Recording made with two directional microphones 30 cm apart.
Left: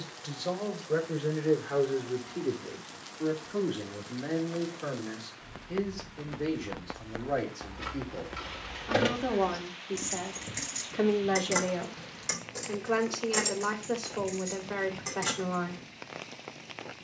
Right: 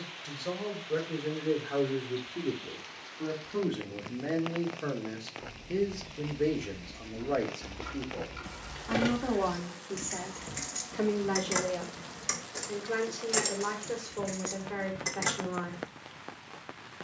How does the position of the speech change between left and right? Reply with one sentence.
You can hear the speech go right and come back.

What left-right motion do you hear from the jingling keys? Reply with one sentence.
You can hear the jingling keys go left and come back.